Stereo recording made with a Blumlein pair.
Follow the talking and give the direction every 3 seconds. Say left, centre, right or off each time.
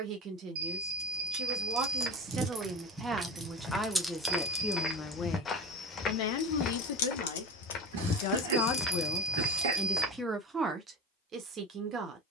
right, centre, left, centre.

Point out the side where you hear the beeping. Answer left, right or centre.
right.